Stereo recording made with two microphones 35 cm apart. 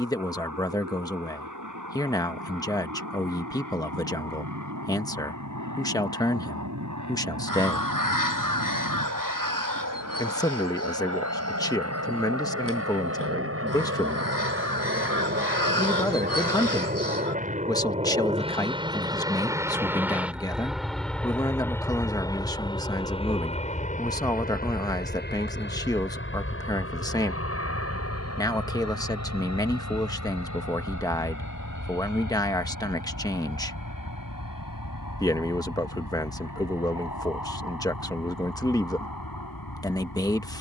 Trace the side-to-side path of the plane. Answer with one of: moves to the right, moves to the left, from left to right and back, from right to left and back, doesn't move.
moves to the left.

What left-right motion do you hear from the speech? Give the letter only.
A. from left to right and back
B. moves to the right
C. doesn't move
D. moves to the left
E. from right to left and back
C.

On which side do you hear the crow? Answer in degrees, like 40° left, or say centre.
60° left.